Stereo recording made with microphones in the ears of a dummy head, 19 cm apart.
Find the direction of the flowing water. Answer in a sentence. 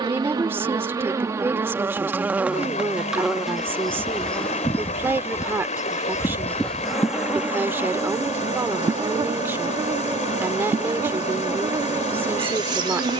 You can hear the flowing water on the left.